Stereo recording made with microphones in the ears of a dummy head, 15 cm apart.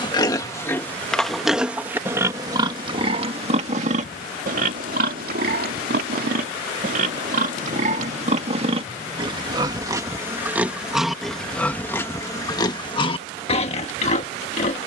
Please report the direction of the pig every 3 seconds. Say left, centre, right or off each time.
centre, right, right, centre, left.